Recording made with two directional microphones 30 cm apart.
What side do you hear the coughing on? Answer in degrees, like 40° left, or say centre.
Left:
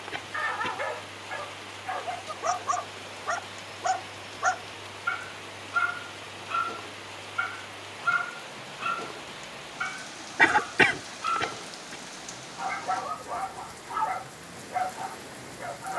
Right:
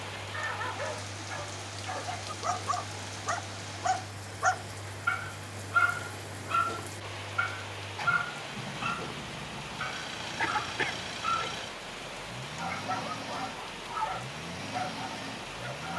70° left.